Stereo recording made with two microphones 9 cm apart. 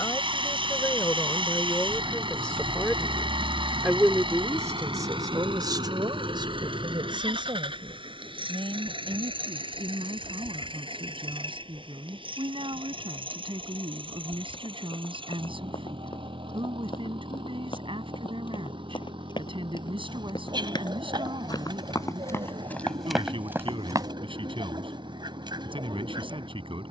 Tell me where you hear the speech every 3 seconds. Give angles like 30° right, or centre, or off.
20° left, 30° right, 70° right, 80° right, 80° right, 80° right, 80° right, 80° right, 80° right.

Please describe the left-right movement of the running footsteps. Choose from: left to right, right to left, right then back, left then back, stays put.
left to right.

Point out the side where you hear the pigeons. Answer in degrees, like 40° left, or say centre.
60° right.